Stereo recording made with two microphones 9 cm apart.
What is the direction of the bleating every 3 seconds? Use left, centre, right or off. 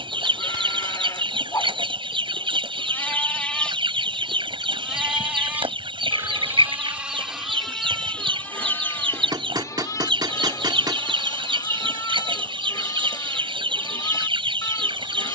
left, centre, centre, left, left.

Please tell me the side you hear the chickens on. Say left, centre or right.
right.